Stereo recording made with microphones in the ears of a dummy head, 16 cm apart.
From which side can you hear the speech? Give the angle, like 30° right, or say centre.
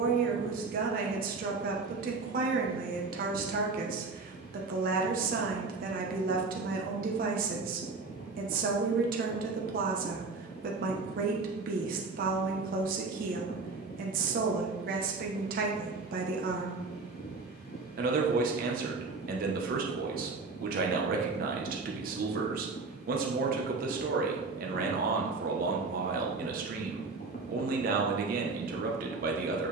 50° right.